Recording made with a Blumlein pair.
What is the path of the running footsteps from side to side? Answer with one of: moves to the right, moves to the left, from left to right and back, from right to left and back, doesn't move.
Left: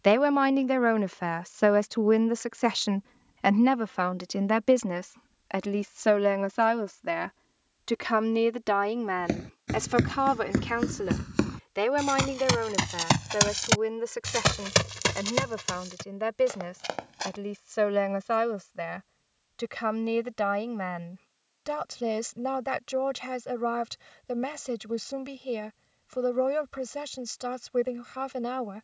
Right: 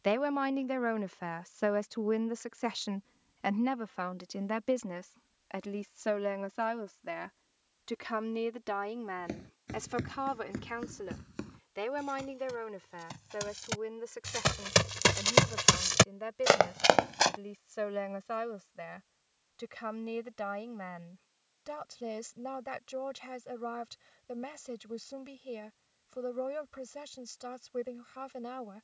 moves to the right.